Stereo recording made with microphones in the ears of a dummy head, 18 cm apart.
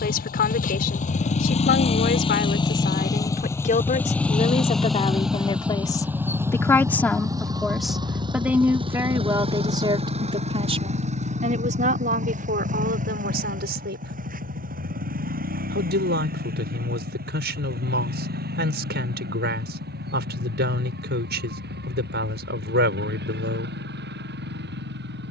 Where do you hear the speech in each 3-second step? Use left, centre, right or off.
left, left, centre, right, right, right, right, right, off.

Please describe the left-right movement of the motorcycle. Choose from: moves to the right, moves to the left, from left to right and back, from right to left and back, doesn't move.
moves to the right.